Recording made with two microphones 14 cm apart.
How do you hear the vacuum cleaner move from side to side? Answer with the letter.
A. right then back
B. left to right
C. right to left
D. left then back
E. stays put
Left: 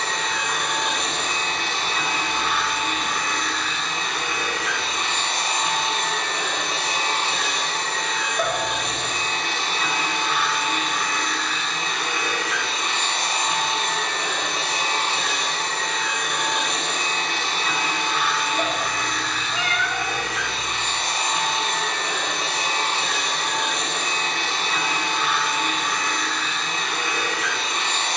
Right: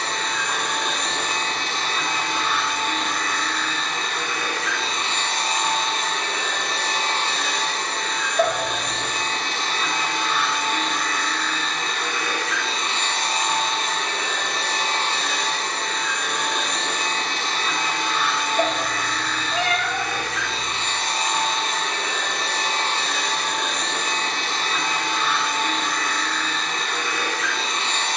E.